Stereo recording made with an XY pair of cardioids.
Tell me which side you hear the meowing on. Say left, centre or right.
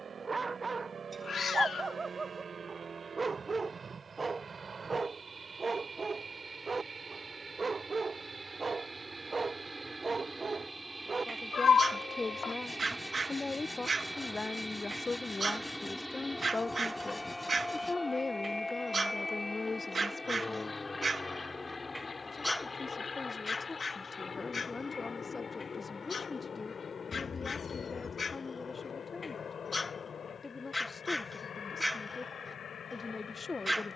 left.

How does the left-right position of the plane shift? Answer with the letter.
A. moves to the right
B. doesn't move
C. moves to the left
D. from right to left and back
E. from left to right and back
C.